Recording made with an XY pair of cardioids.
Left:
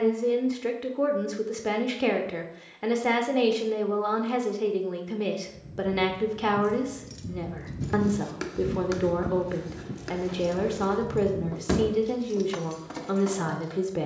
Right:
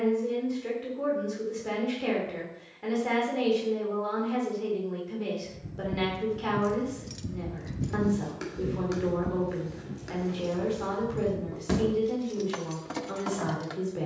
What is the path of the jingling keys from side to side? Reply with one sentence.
You can hear the jingling keys move from right to left and back again.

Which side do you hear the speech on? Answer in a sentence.
In this clip you hear the speech on the left.